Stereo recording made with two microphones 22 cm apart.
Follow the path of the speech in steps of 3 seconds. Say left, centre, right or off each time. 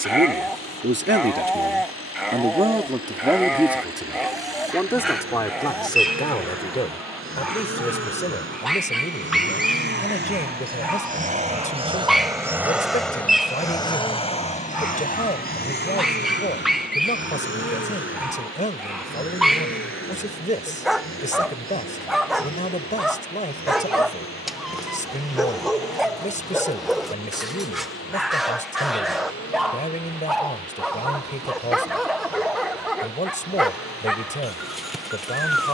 right, centre, left, left, left, left, left, left, left, left, left, left.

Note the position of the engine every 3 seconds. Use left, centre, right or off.
right, right, right, right, centre, left, left, left, left, left, left, left.